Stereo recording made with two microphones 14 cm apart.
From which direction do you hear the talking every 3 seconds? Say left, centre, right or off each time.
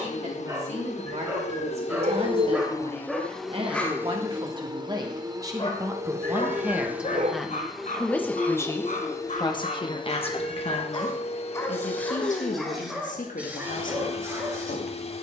right, right, centre, left, left.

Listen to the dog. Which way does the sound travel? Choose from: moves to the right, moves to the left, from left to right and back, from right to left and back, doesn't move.
from right to left and back.